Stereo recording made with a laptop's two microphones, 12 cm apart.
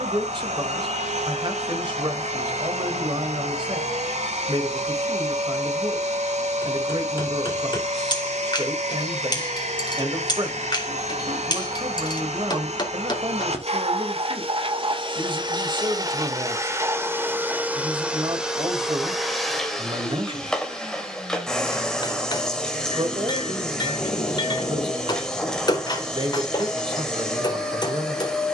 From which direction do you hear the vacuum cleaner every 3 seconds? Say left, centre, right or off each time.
right, right, right, right, right, right, centre, centre, centre, centre.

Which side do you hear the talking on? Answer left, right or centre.
right.